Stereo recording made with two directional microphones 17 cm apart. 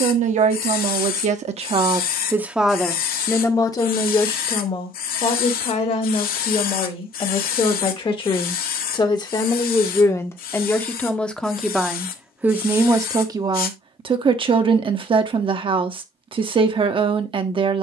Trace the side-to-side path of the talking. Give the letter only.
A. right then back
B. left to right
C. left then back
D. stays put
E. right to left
C.